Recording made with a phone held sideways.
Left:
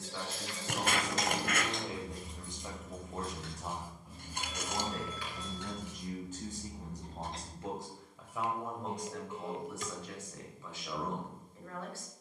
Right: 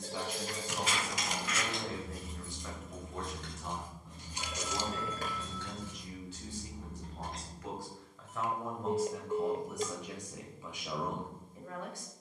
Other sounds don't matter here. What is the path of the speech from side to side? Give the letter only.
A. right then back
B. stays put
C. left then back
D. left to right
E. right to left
C.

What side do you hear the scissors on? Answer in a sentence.
You can hear the scissors on the left.